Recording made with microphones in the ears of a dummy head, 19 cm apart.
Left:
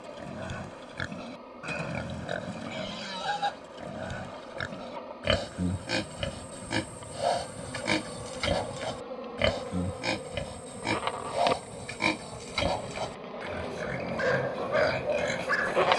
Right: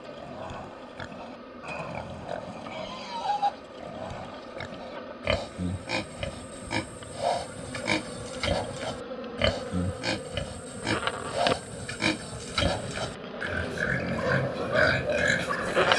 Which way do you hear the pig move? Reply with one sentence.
You can hear the pig travel towards the right.